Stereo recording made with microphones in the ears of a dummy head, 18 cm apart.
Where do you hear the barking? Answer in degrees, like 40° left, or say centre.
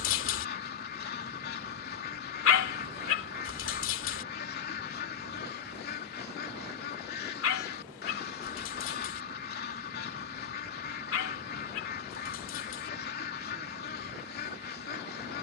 70° left.